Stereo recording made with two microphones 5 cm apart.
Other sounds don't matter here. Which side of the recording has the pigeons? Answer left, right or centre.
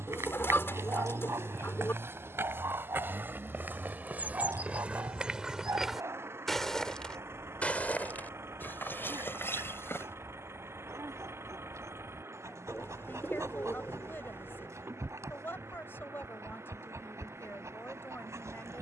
left.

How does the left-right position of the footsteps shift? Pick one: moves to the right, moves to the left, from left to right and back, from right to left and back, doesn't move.
moves to the left.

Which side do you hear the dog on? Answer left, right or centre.
right.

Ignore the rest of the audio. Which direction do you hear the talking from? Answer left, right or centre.
left.